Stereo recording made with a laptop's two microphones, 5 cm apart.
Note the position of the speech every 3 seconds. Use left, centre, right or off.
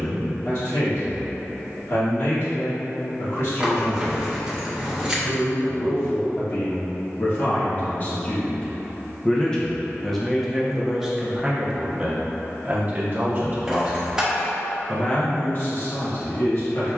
left, left, left, centre, right, left.